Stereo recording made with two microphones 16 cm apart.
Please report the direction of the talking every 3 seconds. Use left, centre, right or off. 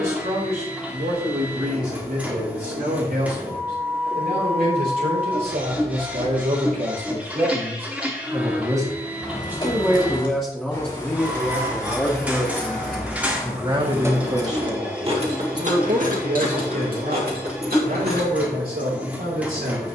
right, right, right, centre, right, right, right.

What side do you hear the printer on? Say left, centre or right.
centre.